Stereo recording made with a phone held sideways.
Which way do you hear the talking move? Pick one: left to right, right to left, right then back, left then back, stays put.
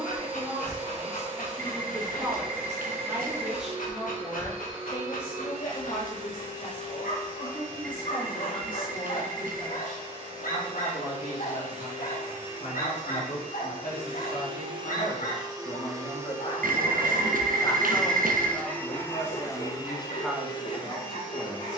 left then back.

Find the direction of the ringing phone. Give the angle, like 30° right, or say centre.
70° right.